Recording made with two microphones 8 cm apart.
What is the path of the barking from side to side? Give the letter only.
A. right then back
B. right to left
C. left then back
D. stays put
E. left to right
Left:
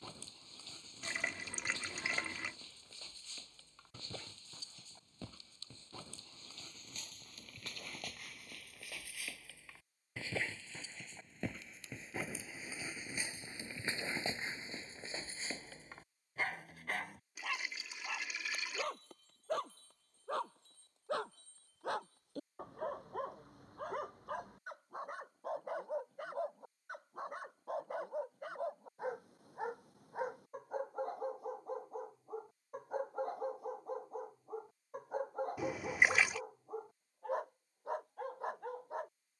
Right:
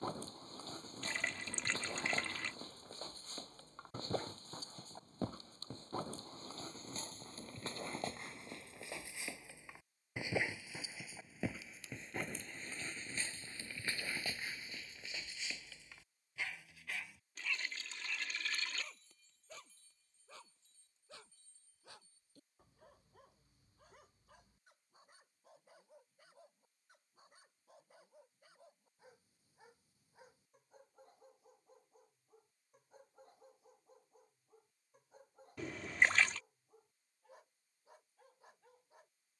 B.